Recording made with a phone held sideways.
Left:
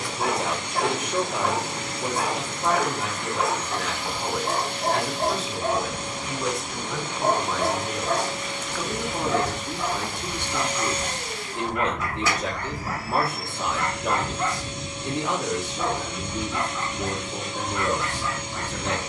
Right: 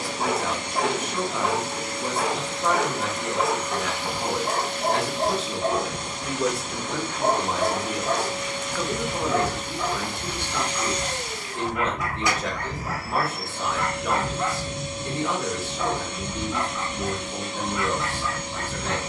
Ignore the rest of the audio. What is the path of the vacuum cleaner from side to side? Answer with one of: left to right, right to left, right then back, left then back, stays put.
left then back.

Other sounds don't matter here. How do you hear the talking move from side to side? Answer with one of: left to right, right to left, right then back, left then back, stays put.
right then back.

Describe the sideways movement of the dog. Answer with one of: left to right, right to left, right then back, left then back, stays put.
stays put.